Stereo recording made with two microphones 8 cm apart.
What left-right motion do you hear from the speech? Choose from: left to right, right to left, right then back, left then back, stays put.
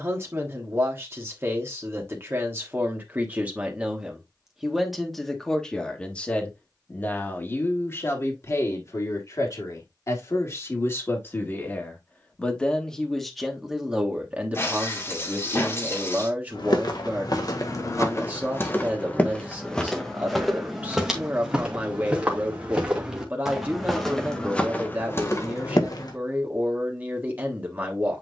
left then back.